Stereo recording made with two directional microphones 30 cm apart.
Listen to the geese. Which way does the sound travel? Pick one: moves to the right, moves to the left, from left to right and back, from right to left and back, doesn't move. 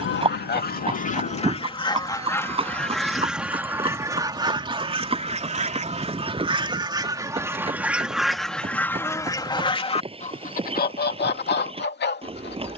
from left to right and back.